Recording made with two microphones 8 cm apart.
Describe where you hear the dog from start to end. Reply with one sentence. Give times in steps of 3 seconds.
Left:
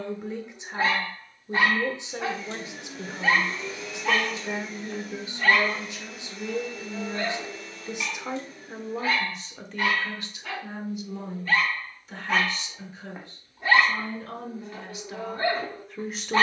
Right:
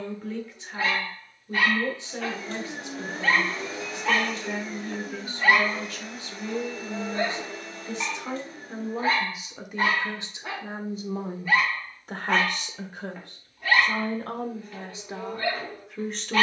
You can hear the dog on the left from 0 s, in the centre from 3 s, on the right from 6 s and on the left from 12 s.